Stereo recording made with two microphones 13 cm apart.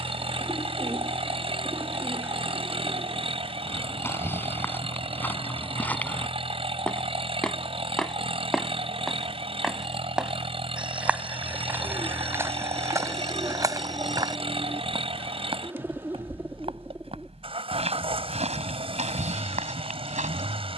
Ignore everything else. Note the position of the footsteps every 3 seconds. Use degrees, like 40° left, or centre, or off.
off, 10° left, 10° left, 10° right, 20° right, 50° right, 60° right.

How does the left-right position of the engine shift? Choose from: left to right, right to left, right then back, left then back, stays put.
stays put.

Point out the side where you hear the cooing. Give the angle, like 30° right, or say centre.
20° right.